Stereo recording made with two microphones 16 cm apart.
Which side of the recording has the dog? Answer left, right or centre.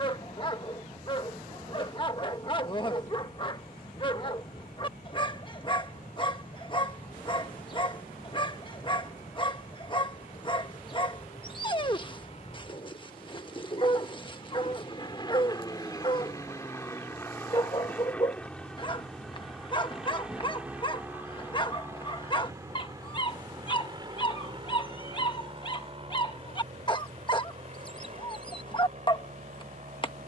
left.